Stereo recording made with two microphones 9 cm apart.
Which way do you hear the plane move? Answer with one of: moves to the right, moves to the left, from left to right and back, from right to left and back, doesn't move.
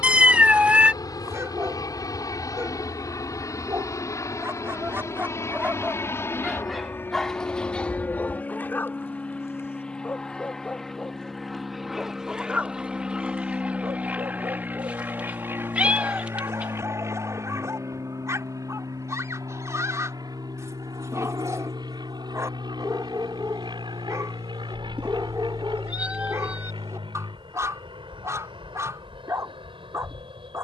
moves to the right.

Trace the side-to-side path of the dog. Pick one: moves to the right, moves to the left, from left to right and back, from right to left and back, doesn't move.
from right to left and back.